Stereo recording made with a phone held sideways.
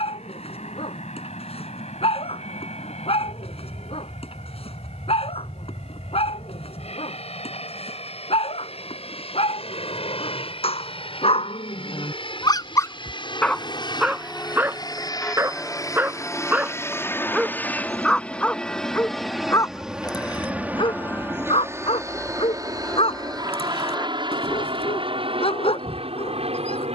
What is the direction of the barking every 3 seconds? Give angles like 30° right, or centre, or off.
50° left, 50° left, 50° left, 50° left, 10° left, 10° right, 20° left, 50° left, 50° left.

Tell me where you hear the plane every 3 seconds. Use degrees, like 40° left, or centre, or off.
70° left, 60° left, 60° left, 50° left, 40° left, 20° left, centre, 30° right, 40° right.